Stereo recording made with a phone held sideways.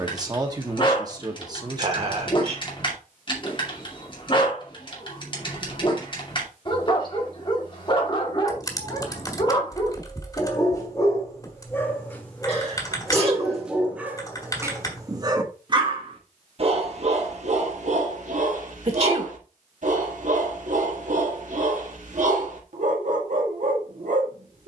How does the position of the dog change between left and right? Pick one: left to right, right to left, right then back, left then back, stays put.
left to right.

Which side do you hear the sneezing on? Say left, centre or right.
right.